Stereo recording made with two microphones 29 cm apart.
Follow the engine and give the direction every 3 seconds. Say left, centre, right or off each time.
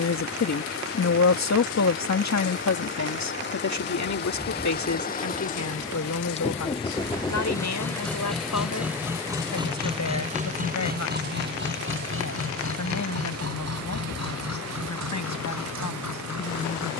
left, left, centre, right, right, right.